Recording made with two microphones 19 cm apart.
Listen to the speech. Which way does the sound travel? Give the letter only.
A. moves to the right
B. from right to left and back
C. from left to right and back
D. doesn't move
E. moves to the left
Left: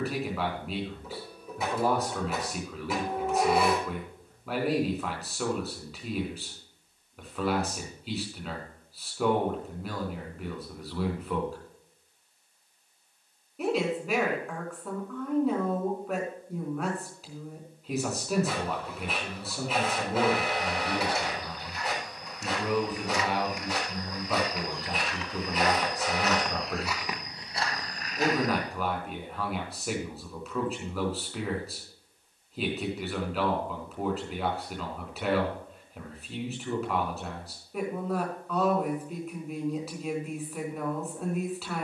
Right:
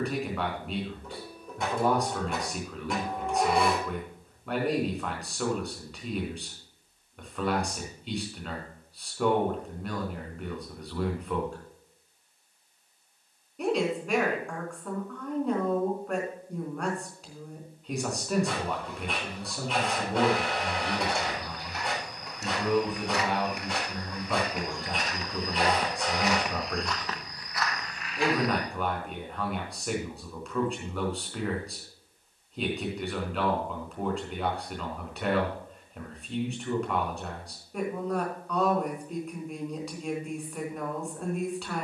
D.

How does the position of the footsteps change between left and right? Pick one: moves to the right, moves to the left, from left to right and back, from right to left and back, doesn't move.
moves to the left.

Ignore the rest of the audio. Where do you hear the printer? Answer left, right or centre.
centre.